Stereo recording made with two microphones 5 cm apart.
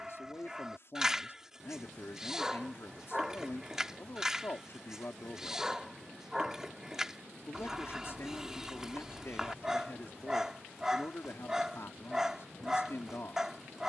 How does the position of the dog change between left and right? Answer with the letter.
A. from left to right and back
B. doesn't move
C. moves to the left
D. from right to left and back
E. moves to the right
B.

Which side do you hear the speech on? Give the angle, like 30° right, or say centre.
60° left.